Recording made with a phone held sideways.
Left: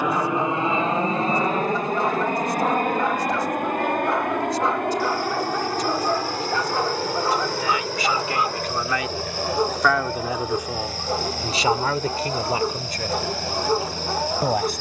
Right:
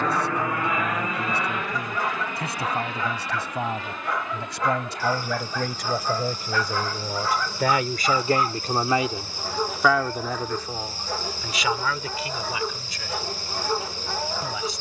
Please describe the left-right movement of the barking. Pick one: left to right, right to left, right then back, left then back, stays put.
stays put.